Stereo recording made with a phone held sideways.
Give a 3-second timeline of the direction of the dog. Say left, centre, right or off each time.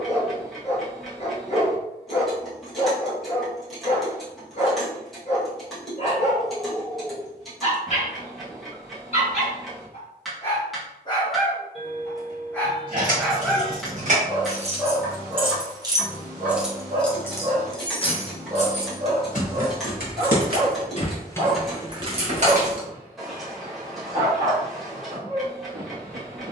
left, left, left, left, centre, right, right, right, right.